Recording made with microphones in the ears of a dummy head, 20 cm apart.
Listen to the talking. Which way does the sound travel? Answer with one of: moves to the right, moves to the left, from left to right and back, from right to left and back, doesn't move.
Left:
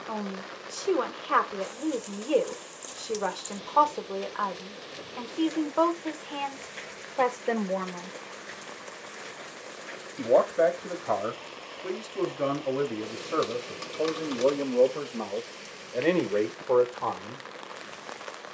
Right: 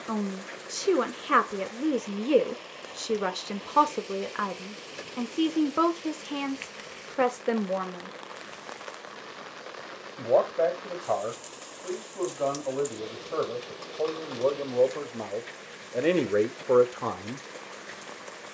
from right to left and back.